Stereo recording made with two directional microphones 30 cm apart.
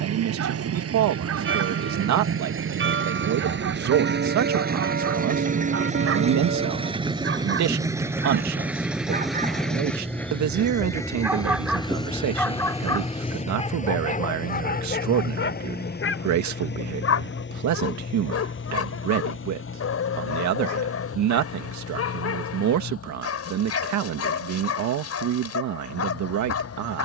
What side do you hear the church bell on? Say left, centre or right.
right.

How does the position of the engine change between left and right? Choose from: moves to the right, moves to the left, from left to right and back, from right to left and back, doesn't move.
moves to the left.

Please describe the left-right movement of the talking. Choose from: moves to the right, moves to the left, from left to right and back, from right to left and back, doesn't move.
doesn't move.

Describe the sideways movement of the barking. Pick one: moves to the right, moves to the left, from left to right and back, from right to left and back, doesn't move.
moves to the left.